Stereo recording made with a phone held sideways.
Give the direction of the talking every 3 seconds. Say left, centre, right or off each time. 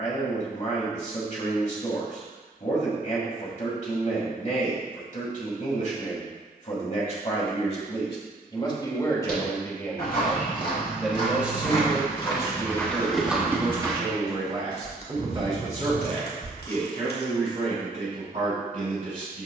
left, left, left, centre, right, right, right.